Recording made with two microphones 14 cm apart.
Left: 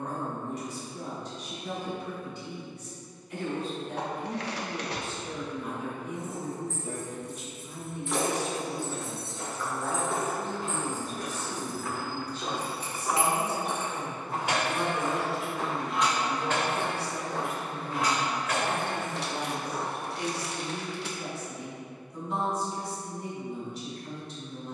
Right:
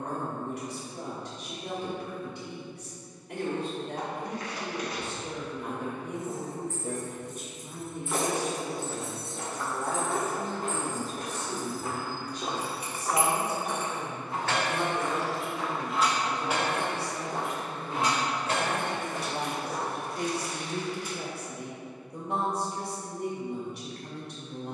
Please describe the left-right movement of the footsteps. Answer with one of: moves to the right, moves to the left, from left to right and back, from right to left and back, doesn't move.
from right to left and back.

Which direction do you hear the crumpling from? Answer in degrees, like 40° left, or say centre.
70° left.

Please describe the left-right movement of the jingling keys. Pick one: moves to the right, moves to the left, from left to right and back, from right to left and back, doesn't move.
from right to left and back.